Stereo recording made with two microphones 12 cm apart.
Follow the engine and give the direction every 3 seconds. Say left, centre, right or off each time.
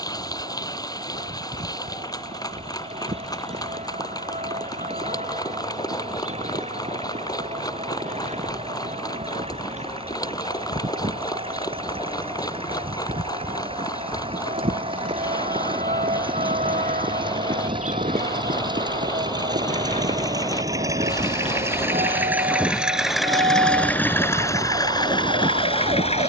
right, right, right, right, right, right, right, centre, left.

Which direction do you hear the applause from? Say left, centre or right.
left.